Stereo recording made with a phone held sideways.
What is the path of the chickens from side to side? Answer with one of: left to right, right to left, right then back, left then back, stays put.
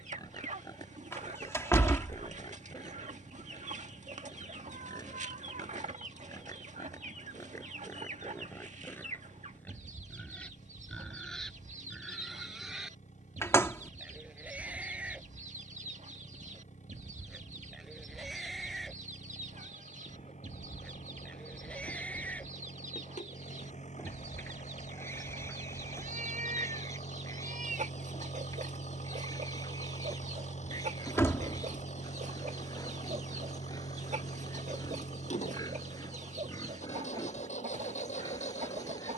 stays put.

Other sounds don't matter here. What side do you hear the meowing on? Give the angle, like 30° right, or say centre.
70° right.